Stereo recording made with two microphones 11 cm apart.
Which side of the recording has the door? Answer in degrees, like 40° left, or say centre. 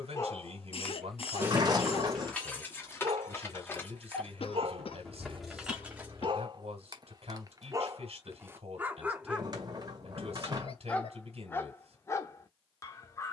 40° right.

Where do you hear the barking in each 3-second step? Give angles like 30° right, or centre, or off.
10° right, 60° right, 30° right, 10° left, 30° left.